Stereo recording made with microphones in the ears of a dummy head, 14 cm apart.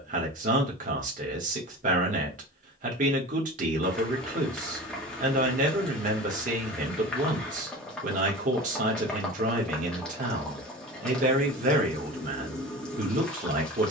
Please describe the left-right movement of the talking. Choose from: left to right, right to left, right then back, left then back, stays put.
stays put.